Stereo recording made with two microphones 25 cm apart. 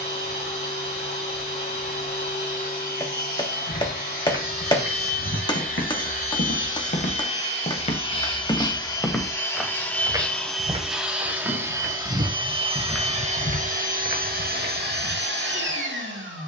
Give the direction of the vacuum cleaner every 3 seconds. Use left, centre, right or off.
left, left, left, centre, right, right.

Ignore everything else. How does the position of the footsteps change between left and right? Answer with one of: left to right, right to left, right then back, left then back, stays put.
right then back.